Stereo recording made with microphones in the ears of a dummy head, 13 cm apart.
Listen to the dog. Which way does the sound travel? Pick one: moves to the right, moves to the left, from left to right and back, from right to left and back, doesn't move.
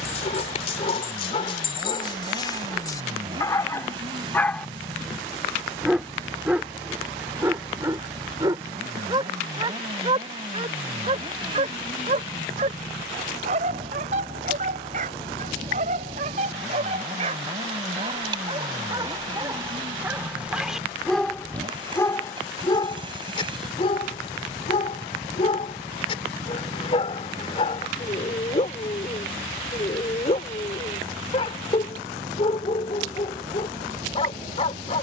from left to right and back.